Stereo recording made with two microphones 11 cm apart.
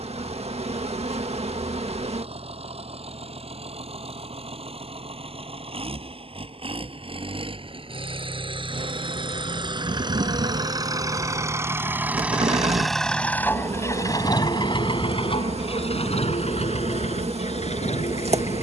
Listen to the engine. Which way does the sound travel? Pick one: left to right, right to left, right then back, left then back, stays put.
right to left.